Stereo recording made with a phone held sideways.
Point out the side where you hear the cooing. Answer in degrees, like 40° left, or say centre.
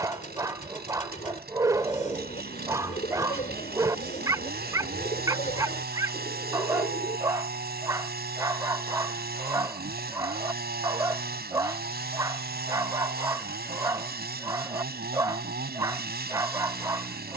50° left.